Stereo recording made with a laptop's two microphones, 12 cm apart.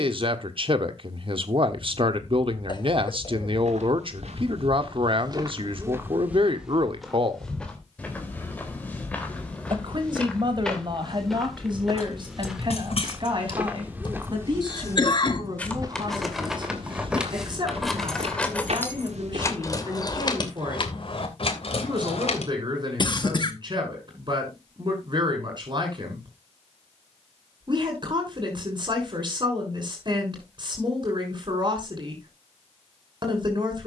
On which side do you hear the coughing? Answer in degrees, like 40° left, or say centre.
40° left.